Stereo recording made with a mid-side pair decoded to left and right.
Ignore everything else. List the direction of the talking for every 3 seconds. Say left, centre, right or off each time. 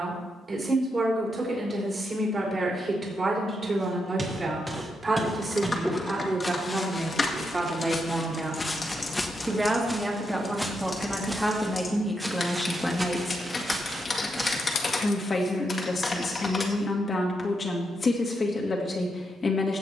right, right, right, centre, centre, left, left.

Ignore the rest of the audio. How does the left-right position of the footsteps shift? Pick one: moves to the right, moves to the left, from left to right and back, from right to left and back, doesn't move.
from right to left and back.